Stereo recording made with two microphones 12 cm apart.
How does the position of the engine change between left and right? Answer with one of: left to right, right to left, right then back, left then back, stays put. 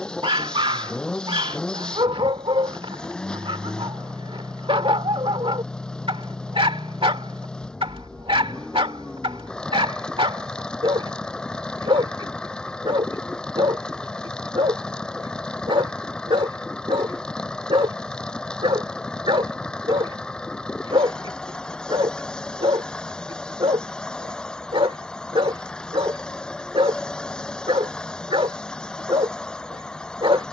stays put.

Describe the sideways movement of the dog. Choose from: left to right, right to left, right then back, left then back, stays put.
stays put.